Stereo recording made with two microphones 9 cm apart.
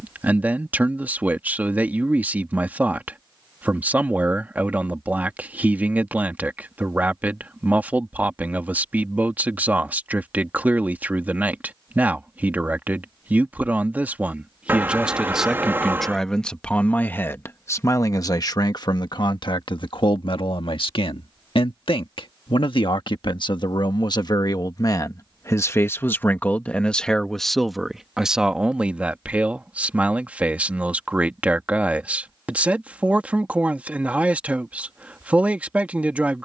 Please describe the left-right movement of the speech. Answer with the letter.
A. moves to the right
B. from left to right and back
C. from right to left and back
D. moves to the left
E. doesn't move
C.